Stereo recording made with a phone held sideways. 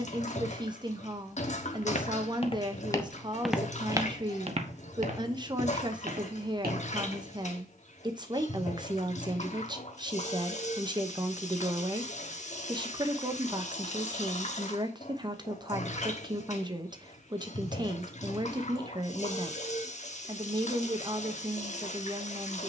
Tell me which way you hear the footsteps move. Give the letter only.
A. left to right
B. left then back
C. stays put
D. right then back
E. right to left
A.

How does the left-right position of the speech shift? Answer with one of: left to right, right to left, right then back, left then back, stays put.
stays put.